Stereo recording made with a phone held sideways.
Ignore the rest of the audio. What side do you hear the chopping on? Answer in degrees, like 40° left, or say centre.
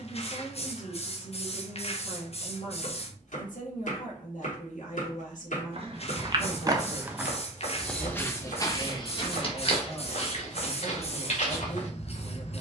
70° left.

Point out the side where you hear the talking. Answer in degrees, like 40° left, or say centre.
70° left.